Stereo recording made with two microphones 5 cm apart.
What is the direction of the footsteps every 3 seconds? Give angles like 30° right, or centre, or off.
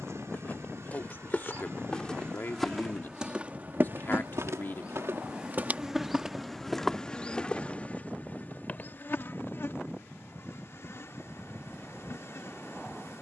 20° left, 40° right, 10° left, off, off.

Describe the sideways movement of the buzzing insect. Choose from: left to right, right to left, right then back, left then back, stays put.
right to left.